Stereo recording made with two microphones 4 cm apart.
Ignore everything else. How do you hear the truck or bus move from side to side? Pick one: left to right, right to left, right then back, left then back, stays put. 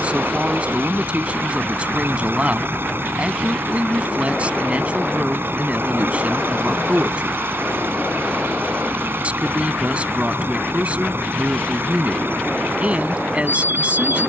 stays put.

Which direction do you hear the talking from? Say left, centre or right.
right.